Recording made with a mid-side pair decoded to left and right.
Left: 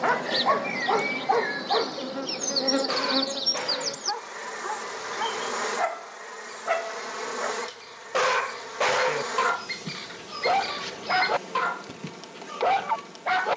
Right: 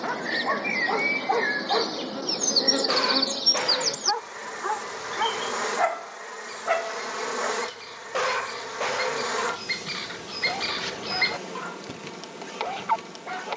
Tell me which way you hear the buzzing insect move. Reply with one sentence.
You can hear the buzzing insect travel towards the right.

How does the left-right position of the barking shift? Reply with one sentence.
In this clip you hear the barking move from left to right and back again.